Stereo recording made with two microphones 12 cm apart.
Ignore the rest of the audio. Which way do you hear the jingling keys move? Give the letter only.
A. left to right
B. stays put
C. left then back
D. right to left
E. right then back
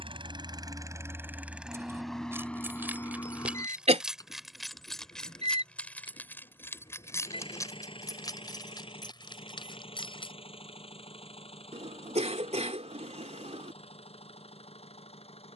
D.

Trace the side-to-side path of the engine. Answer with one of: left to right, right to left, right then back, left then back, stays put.
right to left.